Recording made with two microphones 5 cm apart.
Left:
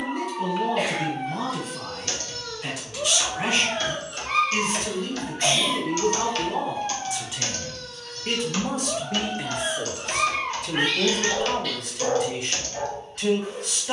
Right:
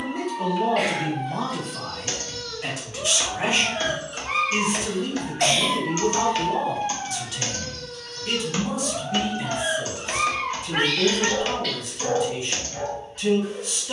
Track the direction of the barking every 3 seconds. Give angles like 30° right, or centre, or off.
30° left, 10° right, 50° right, centre, 30° left.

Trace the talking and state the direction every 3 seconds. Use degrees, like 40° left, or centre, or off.
30° right, 20° right, 20° left, 60° left, 70° left.